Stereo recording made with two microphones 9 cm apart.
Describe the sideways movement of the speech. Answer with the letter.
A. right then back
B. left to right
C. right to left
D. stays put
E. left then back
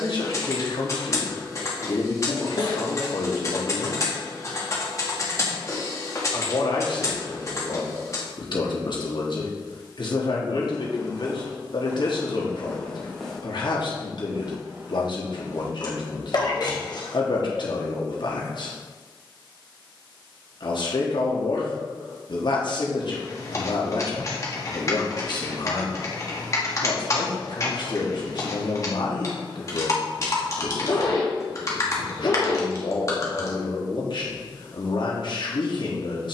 D.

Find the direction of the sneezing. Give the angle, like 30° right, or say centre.
50° left.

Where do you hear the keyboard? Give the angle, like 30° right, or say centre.
40° left.